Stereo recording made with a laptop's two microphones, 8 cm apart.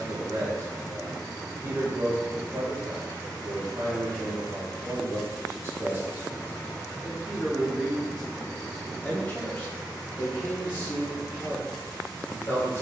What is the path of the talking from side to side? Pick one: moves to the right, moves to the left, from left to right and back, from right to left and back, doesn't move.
moves to the left.